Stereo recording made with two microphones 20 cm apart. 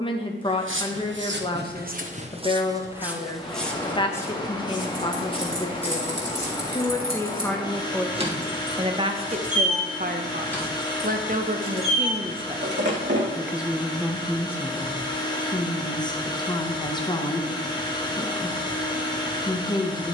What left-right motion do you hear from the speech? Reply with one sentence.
In this clip you hear the speech go right and come back.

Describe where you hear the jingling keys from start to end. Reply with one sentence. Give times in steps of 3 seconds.
You can hear the jingling keys not at all from 0 s, on the right from 3 s, in the centre from 9 s, on the right from 12 s and not at all from 15 s.